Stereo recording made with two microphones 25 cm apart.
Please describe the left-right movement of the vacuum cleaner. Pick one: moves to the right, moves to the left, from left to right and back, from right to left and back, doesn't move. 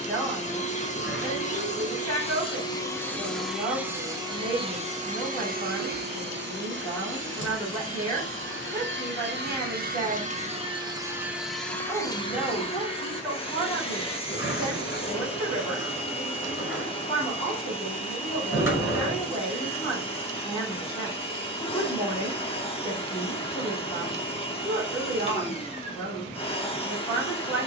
from left to right and back.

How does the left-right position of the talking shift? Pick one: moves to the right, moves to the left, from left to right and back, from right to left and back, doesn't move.
doesn't move.